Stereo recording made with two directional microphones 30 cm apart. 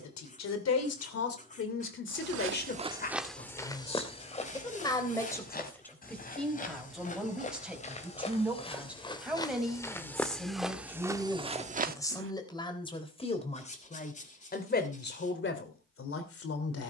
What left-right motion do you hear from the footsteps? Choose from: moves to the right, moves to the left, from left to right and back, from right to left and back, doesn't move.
from right to left and back.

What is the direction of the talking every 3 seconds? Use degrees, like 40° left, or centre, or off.
40° left, 10° left, centre, centre, 20° left, 40° left.